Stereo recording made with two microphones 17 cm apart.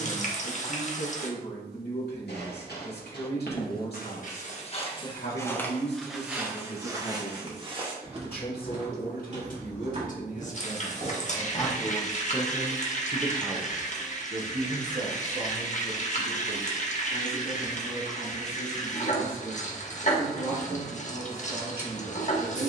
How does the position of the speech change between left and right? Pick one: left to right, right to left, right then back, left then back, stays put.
left to right.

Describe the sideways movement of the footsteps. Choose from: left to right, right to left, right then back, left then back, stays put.
left to right.